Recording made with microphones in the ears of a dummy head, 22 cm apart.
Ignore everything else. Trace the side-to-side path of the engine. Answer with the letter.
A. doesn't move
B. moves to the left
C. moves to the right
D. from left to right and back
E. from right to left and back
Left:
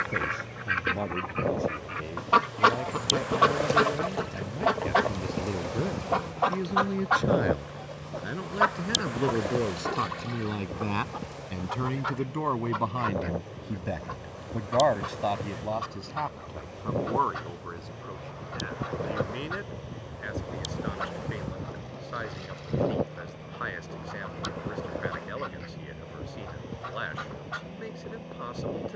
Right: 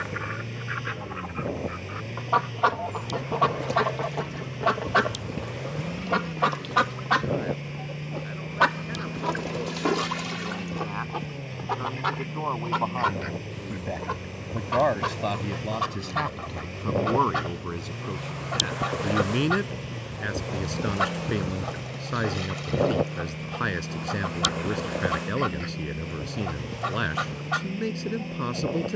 A.